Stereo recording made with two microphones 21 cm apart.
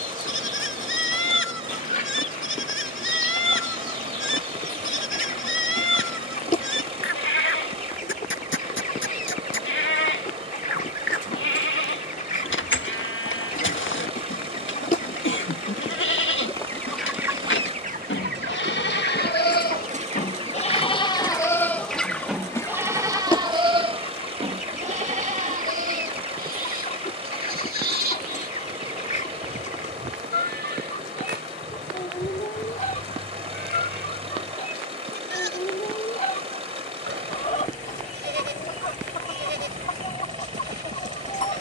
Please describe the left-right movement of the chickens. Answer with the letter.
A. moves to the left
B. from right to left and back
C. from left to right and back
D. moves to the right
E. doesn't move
C.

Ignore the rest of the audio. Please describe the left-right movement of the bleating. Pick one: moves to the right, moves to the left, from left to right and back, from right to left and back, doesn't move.
moves to the right.